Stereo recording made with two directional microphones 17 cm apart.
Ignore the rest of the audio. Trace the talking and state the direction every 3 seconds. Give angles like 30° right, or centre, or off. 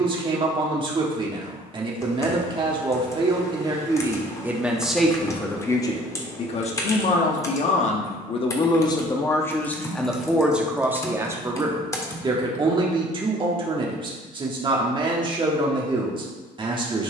30° right, 10° right, 40° left, centre, 30° right, 30° right.